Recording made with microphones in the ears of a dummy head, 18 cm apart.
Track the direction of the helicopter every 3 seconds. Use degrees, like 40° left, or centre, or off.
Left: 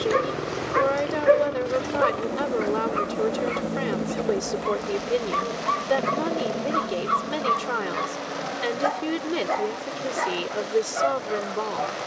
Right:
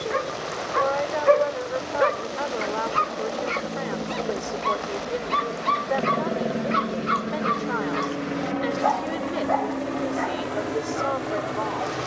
40° left, 10° left, 30° right, 60° right.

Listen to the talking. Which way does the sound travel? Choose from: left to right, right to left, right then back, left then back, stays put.
stays put.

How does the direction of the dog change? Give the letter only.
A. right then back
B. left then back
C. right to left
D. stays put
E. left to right
A.